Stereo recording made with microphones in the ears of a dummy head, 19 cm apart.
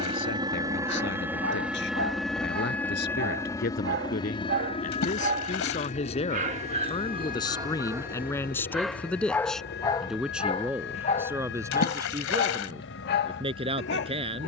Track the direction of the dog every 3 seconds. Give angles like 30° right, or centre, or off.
60° right, 50° right, 20° right, 20° left, 50° left.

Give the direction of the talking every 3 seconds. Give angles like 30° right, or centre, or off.
60° left, 40° left, 20° left, 10° right, 20° right.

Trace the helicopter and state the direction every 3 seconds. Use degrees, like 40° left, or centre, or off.
10° right, 20° left, 40° left, 50° left, 60° left.